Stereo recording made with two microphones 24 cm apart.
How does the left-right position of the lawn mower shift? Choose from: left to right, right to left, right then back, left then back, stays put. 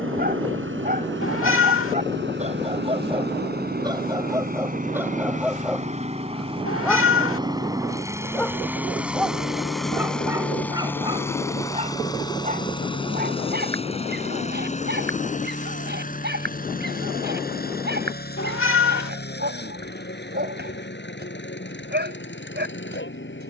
right to left.